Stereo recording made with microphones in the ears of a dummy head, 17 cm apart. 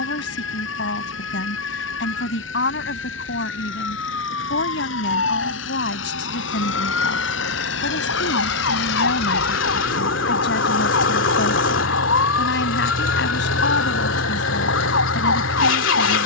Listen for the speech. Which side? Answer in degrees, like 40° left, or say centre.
60° left.